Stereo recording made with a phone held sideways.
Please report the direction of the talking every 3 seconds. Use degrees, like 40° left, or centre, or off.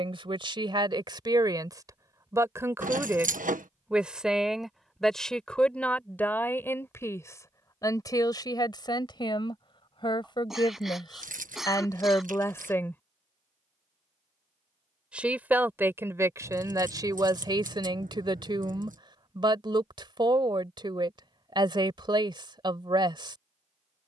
30° right, centre, 20° left, 30° left, 20° left, 20° right, 40° right, 40° right.